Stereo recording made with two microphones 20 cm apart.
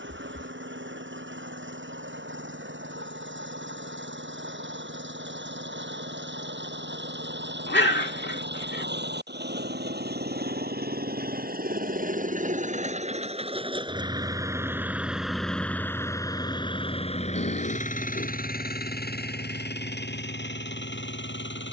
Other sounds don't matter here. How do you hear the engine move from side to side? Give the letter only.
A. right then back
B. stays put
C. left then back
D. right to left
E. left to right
D.